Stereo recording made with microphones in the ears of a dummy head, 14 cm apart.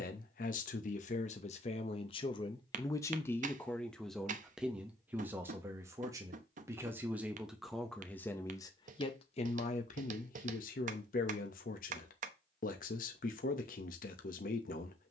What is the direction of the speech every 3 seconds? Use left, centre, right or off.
left, centre, centre, left, left.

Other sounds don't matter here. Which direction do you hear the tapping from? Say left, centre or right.
right.